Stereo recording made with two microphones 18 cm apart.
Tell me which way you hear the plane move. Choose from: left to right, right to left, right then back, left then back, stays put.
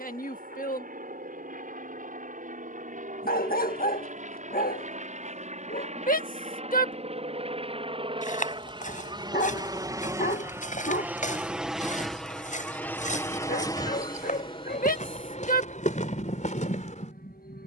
right to left.